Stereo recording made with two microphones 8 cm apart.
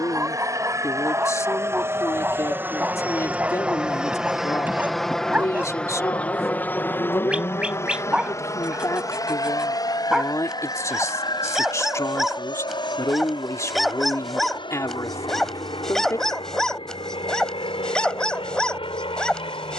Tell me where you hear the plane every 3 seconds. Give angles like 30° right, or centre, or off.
30° right, centre, 30° left, 50° left, 60° left, 70° left, 70° left.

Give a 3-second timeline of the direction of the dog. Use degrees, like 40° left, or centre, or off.
20° right, 20° right, 10° right, 10° right, centre, 10° left, 10° left.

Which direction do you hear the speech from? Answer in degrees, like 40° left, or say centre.
40° left.